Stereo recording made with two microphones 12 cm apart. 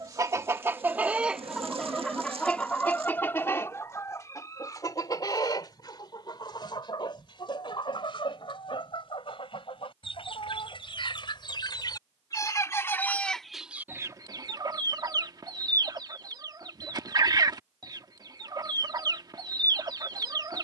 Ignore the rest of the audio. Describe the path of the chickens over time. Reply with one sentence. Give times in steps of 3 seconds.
You can hear the chickens in the centre from 0 s, on the left from 3 s, in the centre from 12 s and on the right from 15 s.